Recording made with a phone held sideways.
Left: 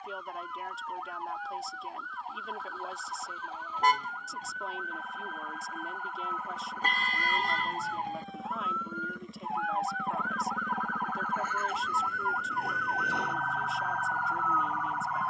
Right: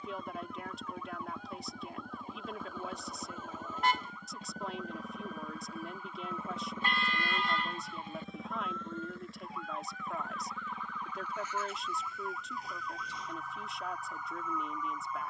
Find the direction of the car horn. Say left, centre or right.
left.